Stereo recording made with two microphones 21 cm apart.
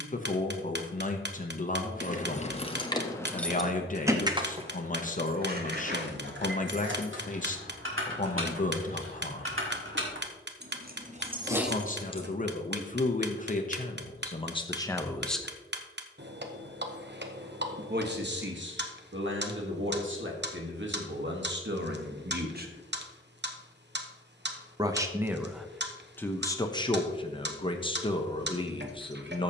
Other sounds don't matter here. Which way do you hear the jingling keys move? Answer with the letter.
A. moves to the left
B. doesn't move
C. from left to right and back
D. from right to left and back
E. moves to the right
C.